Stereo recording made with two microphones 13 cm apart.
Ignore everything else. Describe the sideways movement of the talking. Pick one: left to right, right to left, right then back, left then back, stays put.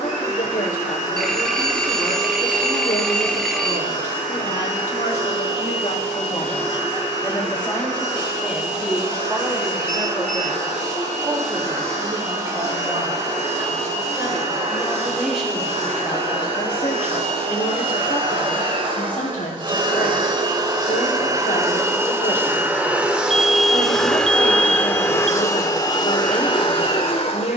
right then back.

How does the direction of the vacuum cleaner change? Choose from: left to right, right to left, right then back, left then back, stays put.
right to left.